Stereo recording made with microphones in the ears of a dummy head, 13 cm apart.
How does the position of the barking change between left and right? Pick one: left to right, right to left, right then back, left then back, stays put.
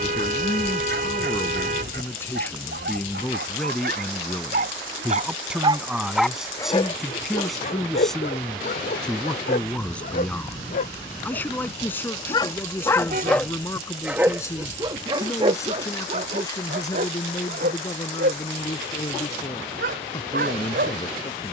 left then back.